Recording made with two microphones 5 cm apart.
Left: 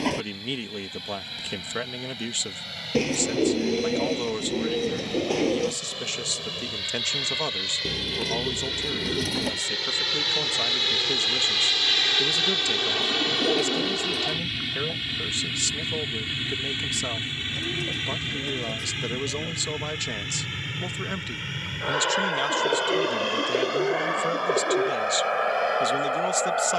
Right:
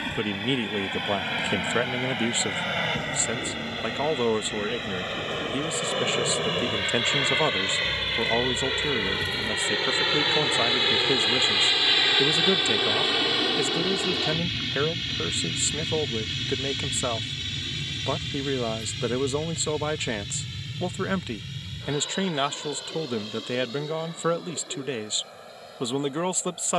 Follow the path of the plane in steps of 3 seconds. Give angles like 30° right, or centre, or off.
50° right, 50° right, 40° right, 20° right, centre, 20° left, 40° left, 50° left, 60° left.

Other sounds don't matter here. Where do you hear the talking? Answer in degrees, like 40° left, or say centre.
20° right.